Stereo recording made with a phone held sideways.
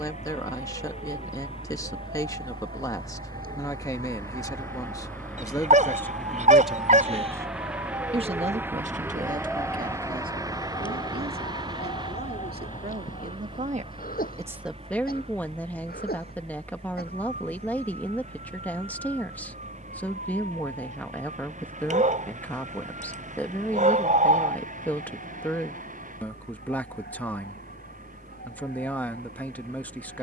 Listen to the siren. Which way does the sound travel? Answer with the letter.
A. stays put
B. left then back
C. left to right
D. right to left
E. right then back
D.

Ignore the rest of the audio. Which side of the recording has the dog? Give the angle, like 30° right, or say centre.
50° right.